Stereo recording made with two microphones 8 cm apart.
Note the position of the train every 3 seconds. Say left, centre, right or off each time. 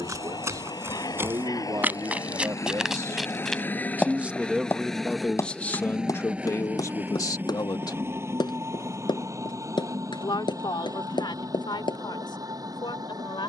left, centre, right, right, right.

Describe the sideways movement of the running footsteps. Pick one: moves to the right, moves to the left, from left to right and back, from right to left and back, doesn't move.
moves to the left.